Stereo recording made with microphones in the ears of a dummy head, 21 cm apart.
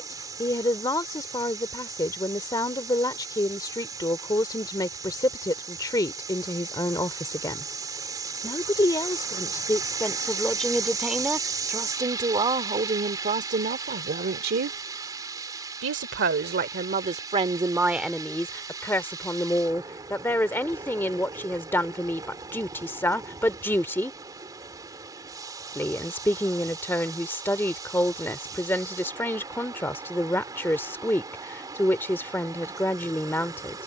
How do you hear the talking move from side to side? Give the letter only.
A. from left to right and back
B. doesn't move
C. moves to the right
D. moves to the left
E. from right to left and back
A.